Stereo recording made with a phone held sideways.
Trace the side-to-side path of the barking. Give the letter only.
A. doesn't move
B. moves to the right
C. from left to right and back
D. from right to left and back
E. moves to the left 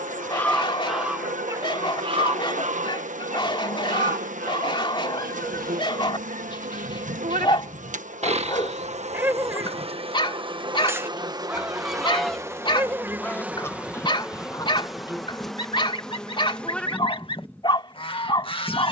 A.